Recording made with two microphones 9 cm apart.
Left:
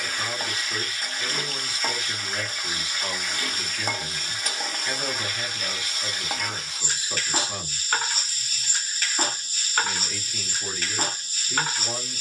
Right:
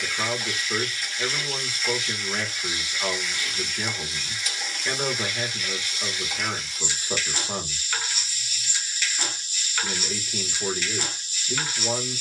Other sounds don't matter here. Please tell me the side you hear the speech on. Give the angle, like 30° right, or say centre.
40° right.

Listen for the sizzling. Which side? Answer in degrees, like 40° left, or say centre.
40° left.